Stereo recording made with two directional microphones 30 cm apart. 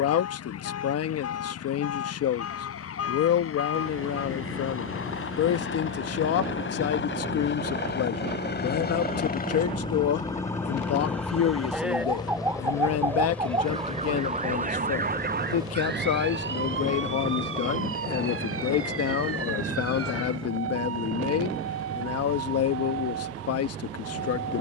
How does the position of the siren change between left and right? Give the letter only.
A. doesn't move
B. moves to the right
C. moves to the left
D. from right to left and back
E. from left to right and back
B.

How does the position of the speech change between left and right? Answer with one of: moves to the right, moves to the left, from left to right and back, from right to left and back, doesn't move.
doesn't move.